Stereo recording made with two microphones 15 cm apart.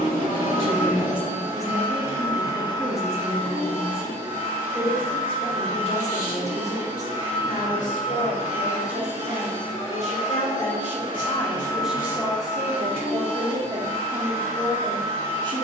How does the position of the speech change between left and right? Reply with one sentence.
In this clip you hear the speech move from right to left and back again.